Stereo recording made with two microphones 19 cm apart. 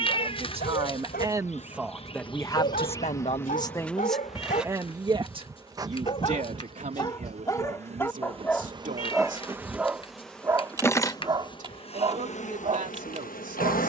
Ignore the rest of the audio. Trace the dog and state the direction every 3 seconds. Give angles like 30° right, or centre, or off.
50° left, 40° left, 20° left, 20° right, 30° right.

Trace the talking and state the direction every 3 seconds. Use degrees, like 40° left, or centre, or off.
10° right, centre, 40° right, 40° right, 40° right.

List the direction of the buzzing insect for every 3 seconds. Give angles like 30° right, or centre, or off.
40° left, centre, 30° right, 10° left, 40° left.